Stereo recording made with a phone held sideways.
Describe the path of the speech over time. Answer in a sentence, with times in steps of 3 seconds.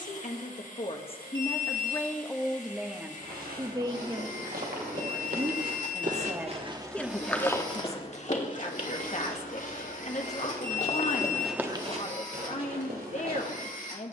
In this clip you hear the speech on the left from 0 s, on the right from 3 s and on the left from 6 s.